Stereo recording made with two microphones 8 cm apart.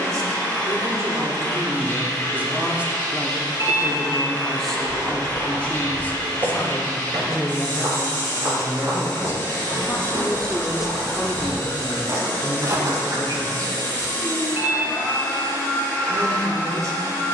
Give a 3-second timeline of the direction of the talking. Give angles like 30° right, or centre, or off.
30° right, centre, 30° left, 10° left, 40° right, 40° right.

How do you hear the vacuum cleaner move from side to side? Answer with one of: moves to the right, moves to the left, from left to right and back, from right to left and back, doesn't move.
doesn't move.